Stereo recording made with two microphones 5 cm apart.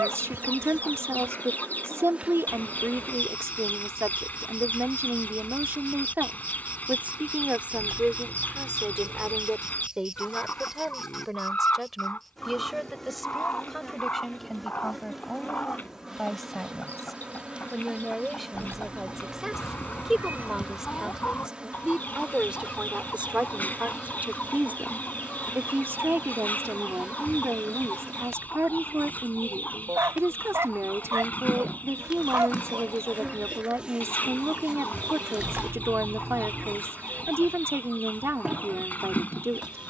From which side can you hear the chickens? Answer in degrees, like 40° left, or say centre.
40° left.